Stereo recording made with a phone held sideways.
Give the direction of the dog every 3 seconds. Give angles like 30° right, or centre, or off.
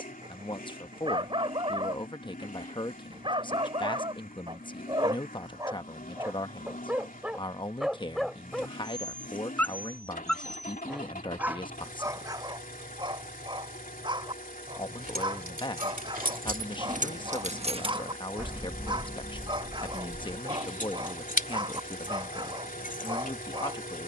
40° right, 30° right, 10° right, centre, 30° right, 30° right, 30° right, 30° right.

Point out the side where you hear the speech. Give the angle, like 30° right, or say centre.
30° left.